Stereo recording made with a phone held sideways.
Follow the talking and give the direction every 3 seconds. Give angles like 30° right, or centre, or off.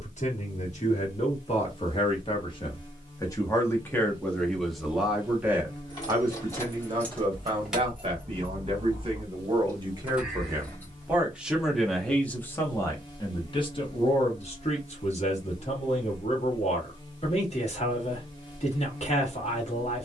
50° left, 10° left, 30° right, 20° right, 30° left, 50° left, 50° left.